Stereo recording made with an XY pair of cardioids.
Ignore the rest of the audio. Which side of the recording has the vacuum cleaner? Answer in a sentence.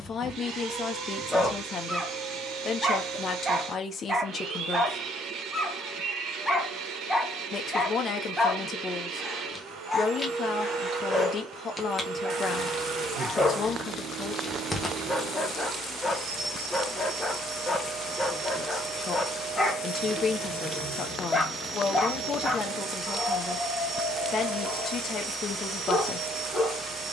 In this clip you hear the vacuum cleaner on the right.